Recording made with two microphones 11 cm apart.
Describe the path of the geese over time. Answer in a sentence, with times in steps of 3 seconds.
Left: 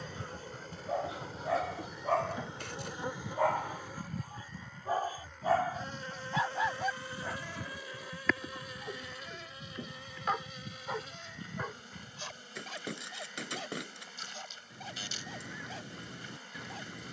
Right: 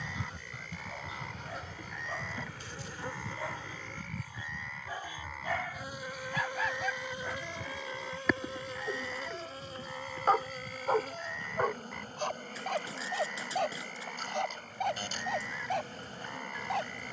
In this clip you hear the geese in the centre from 0 s and on the left from 3 s.